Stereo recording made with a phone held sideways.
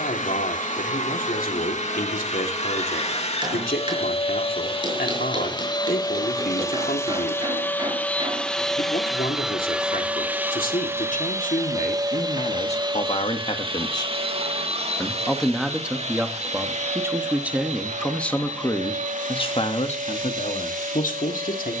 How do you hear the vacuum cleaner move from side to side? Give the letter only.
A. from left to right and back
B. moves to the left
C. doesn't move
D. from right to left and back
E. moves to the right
E.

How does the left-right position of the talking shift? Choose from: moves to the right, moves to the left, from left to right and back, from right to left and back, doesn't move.
from left to right and back.